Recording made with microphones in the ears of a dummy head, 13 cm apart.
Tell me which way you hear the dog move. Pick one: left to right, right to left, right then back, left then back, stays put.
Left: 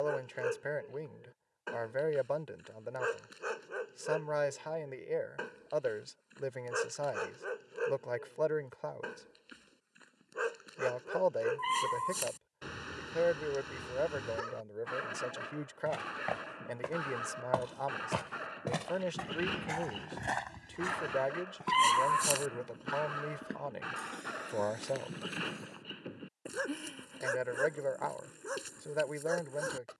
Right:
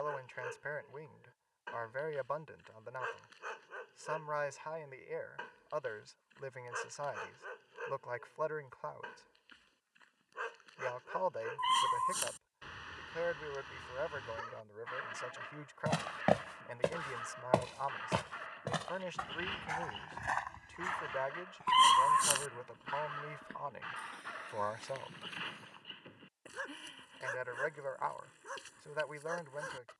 stays put.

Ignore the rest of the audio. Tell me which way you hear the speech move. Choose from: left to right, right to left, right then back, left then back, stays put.
stays put.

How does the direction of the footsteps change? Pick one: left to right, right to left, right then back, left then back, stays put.
right to left.